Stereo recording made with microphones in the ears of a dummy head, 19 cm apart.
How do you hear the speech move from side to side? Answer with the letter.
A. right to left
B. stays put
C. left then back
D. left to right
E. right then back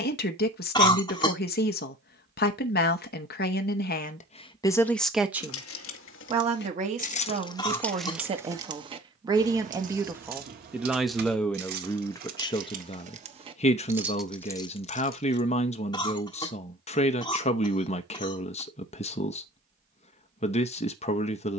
E.